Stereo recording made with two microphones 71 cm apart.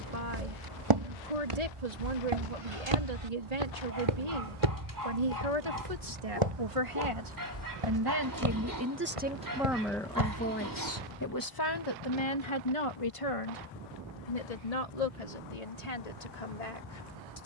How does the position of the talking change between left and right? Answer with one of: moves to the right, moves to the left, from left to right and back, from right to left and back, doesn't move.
moves to the left.